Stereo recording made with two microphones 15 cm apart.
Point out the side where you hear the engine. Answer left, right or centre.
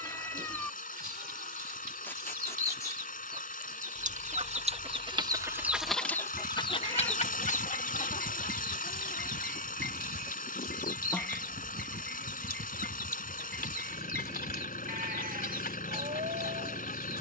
left.